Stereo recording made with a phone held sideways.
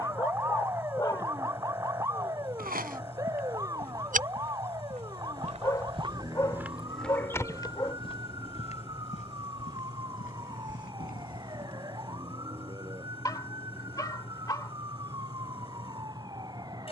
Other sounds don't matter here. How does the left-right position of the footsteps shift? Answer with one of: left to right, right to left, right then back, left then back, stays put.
right to left.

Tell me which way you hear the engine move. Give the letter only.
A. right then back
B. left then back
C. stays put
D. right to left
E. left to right
C.